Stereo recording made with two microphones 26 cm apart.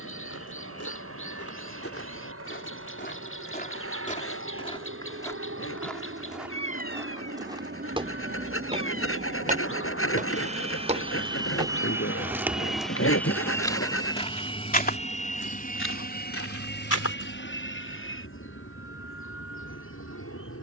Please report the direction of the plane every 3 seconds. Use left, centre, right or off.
right, right, right, right, centre, left, left.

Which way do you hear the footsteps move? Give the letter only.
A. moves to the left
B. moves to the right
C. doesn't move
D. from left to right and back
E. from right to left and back
D.